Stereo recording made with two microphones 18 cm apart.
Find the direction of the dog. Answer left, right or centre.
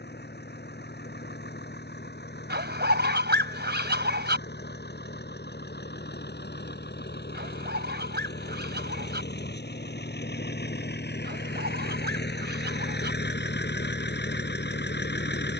right.